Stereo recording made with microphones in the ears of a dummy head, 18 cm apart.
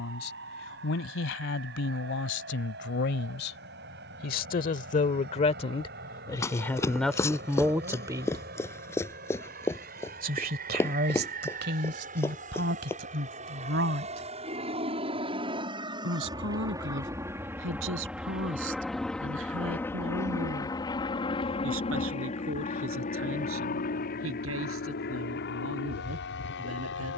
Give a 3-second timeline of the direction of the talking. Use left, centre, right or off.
left, left, centre, right, right, right, right, right, right.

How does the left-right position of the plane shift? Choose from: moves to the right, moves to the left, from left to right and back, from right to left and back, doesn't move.
moves to the left.